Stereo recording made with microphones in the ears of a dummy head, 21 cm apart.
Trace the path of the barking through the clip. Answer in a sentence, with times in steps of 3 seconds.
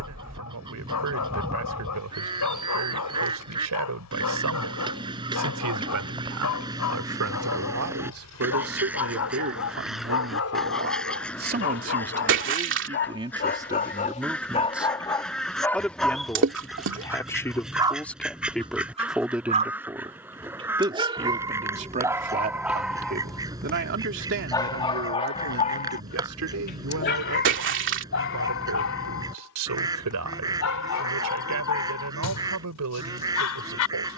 You can hear the barking on the left from 0 s, in the centre from 15 s, on the right from 18 s, in the centre from 21 s and on the left from 24 s.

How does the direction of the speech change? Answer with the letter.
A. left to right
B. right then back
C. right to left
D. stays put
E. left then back
E.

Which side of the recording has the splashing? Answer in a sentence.
You can hear the splashing on the right.